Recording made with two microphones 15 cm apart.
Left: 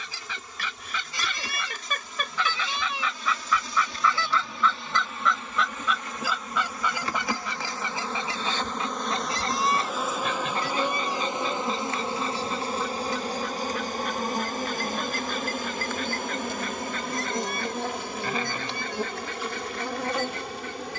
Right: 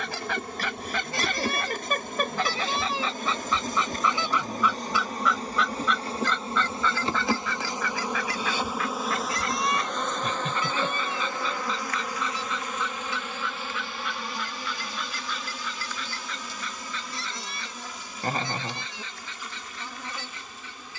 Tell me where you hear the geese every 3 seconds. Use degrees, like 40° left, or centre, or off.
50° right, 10° right, 20° left, 40° left, 40° left, 50° left, 50° left.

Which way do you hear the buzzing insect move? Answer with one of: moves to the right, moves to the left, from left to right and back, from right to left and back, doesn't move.
moves to the left.